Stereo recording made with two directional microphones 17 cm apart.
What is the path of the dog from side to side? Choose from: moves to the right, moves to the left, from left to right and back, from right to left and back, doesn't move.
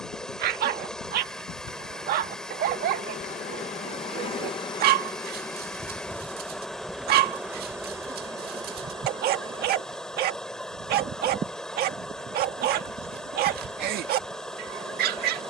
doesn't move.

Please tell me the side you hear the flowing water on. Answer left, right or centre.
centre.